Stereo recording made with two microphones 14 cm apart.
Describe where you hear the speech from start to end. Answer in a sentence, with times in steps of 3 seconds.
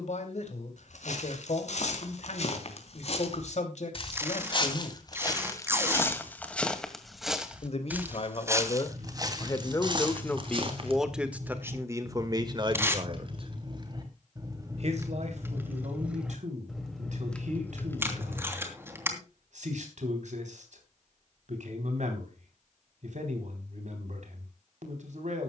You can hear the speech on the left from 0 s, in the centre from 9 s and on the right from 12 s.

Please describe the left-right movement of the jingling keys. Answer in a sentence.
You can hear the jingling keys move from right to left.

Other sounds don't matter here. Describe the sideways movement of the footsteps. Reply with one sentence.
You can hear the footsteps travel towards the right.